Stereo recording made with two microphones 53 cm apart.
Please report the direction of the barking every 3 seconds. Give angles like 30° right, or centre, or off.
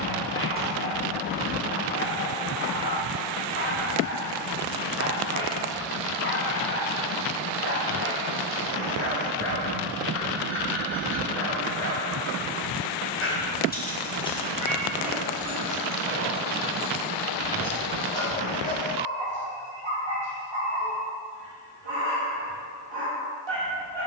20° left, 20° left, 20° left, 20° left, 10° left, 20° right, 50° right, 50° right.